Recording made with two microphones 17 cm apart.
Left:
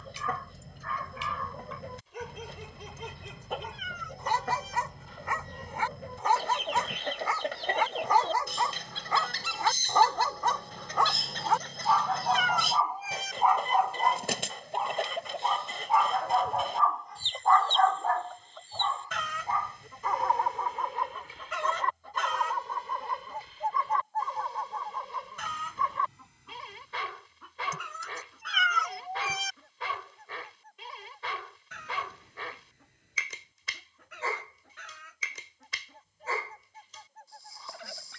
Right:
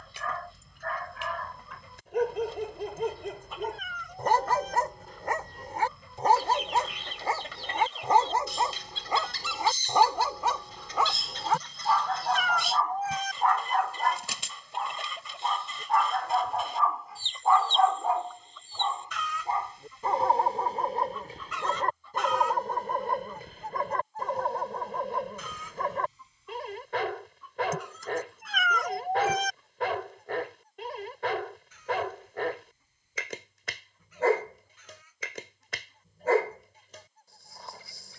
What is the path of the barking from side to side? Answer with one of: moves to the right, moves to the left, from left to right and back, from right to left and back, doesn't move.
from right to left and back.